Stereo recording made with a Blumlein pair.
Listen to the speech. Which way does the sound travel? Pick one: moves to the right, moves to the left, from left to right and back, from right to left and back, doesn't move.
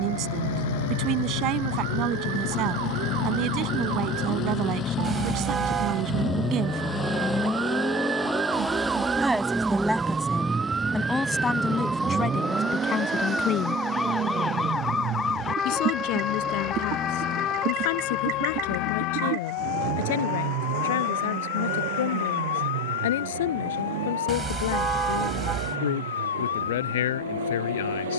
moves to the left.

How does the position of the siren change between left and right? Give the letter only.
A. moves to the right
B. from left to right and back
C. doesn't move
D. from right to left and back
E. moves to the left
E.